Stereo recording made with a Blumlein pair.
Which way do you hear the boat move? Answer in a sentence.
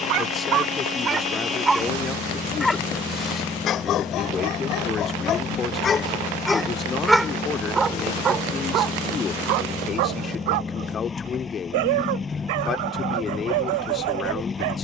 You can hear the boat stay put.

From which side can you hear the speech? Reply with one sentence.
In this clip you hear the speech on the left.